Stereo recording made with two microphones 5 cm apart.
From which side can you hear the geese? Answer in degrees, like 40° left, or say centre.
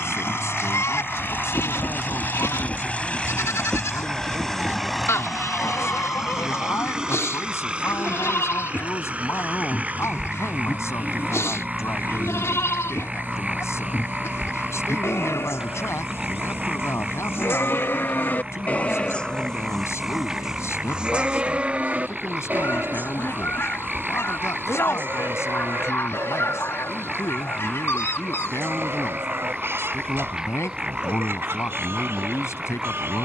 60° left.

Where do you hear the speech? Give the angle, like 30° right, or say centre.
80° left.